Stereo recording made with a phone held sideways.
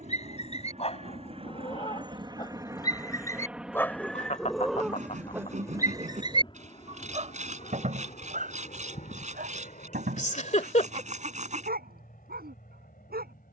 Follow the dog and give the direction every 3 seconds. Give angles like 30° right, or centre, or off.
40° left, centre, 50° right, 70° right, 80° right.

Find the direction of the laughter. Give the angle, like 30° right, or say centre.
50° left.